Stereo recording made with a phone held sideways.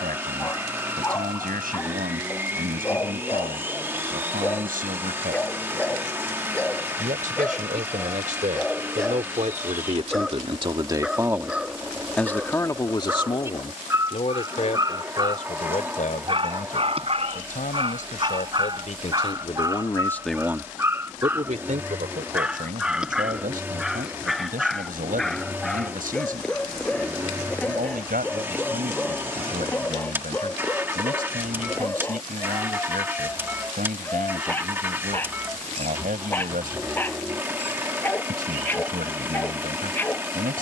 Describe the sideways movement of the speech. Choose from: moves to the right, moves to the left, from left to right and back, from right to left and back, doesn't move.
from right to left and back.